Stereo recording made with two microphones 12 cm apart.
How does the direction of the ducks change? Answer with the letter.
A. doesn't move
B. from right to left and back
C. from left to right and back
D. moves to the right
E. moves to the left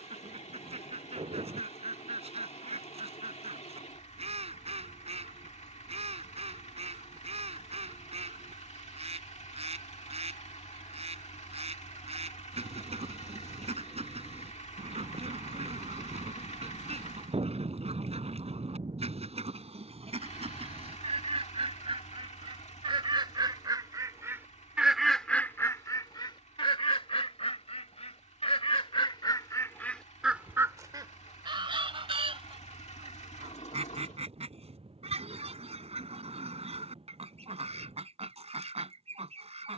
B.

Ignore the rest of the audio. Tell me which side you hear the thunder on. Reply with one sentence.
You can hear the thunder on the right.